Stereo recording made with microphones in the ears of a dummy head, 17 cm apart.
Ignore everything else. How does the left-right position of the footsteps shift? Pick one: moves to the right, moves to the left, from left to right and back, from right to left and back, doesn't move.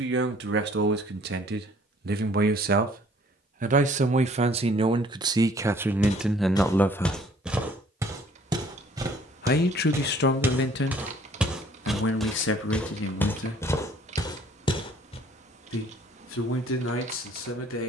from left to right and back.